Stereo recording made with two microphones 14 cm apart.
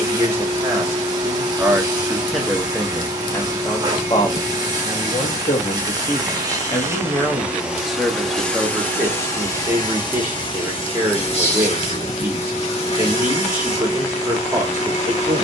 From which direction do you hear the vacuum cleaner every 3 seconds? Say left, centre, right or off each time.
right, right, centre, left, left.